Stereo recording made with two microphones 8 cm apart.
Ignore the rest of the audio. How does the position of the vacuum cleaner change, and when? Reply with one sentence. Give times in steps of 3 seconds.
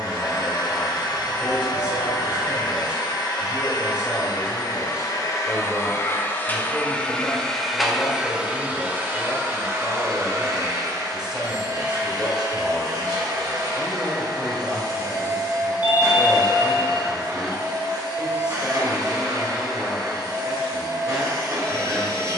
In this clip you hear the vacuum cleaner on the left from 0 s, in the centre from 6 s and on the right from 9 s.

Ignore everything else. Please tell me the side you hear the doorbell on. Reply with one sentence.
You can hear the doorbell on the left.